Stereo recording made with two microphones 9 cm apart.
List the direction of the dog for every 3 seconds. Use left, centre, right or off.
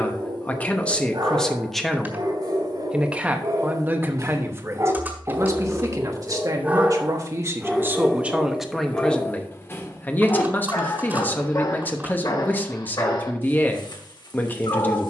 right, right, centre, left, left.